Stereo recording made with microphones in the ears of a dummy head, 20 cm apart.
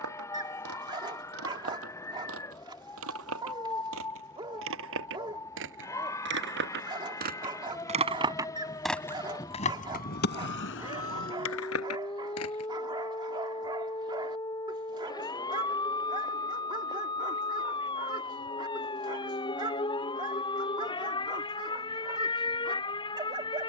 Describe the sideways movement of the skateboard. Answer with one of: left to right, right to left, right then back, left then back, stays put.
right to left.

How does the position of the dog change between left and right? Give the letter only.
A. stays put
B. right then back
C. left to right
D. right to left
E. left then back
A.